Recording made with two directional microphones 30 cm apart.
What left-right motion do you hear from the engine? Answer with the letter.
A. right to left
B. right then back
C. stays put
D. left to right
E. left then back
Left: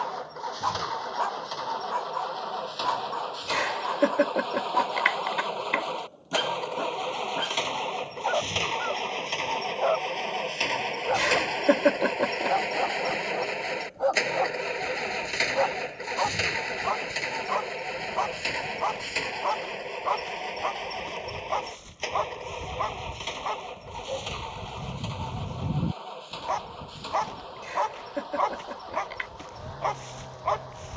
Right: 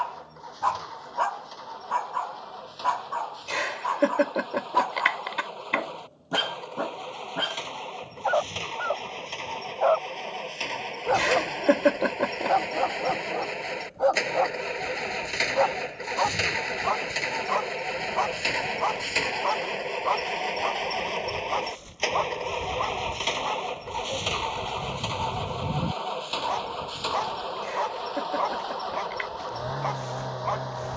D.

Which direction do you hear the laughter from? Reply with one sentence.
You can hear the laughter in the centre.